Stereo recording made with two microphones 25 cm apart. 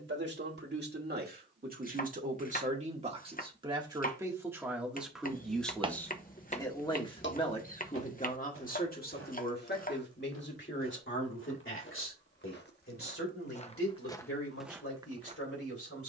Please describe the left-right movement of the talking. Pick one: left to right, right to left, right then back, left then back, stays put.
right to left.